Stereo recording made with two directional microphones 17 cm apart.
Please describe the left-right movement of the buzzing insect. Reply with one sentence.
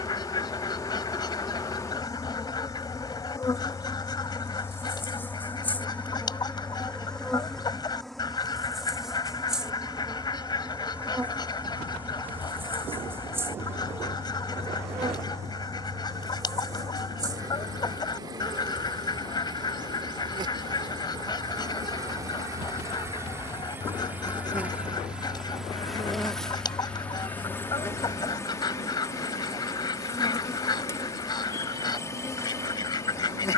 You can hear the buzzing insect move from left to right and back again.